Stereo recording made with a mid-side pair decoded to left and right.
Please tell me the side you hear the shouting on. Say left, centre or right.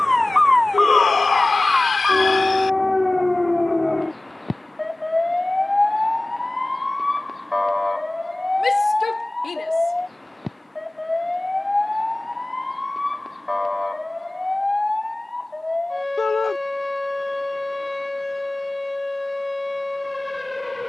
left.